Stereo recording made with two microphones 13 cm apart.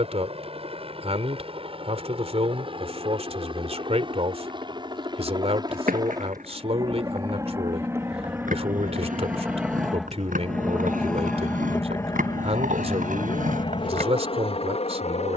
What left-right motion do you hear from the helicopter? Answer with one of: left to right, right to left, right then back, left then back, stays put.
right to left.